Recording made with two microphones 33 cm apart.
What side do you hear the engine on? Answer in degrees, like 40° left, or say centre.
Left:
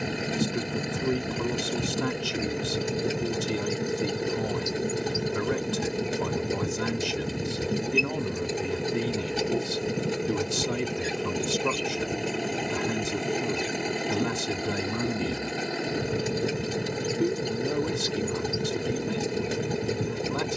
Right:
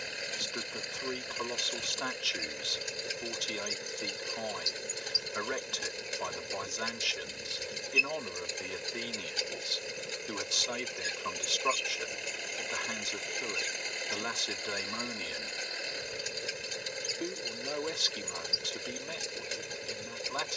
70° left.